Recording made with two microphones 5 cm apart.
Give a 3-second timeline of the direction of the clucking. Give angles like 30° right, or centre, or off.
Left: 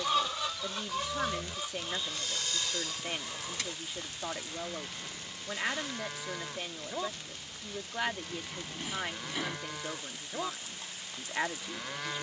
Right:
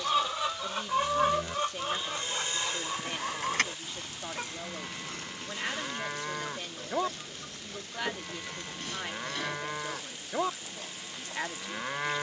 30° right, 50° right, 60° right, 60° right.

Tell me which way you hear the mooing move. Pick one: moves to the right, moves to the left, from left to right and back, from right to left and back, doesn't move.
doesn't move.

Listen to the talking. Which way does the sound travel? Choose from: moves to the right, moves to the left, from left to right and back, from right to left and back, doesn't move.
doesn't move.